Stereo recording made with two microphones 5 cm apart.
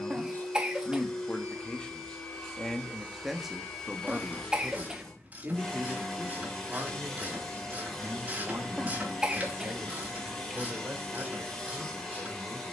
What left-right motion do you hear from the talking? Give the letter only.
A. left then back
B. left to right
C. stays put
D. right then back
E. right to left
B.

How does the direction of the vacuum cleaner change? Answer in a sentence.
In this clip you hear the vacuum cleaner stay in one place.